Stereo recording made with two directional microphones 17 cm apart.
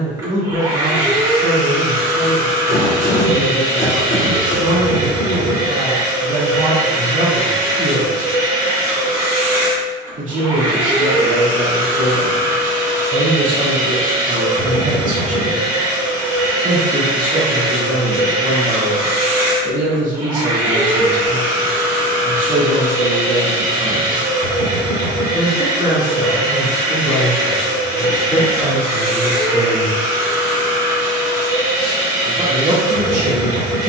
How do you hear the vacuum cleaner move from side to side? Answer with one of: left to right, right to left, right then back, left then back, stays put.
stays put.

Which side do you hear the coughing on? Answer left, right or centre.
left.